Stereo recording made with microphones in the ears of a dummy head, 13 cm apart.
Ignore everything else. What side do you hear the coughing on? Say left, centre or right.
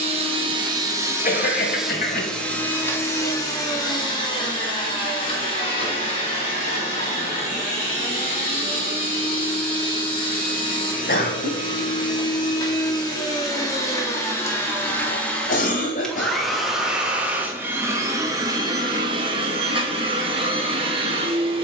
left.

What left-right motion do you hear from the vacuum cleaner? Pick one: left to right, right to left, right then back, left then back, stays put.
left then back.